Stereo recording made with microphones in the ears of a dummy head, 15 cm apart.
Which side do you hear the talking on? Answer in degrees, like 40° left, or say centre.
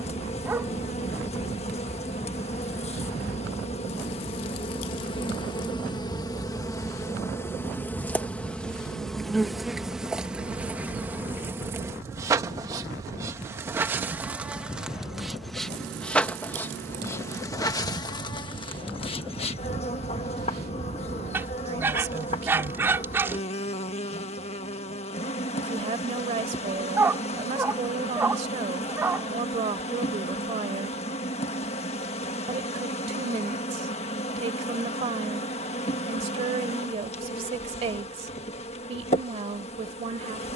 40° right.